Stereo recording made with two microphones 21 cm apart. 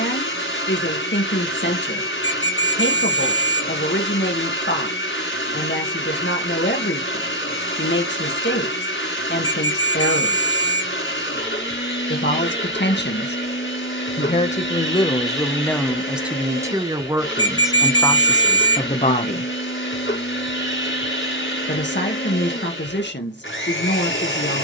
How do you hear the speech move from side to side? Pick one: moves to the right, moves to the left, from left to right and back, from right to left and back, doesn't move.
from left to right and back.